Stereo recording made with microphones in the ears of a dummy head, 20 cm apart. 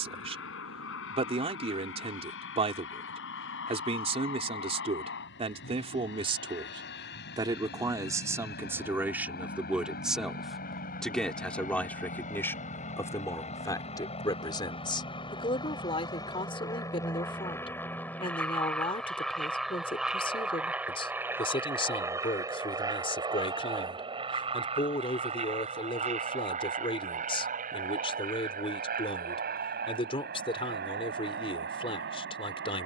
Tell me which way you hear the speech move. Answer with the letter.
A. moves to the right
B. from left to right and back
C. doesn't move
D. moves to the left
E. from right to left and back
D.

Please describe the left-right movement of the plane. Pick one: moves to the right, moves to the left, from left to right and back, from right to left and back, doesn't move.
moves to the right.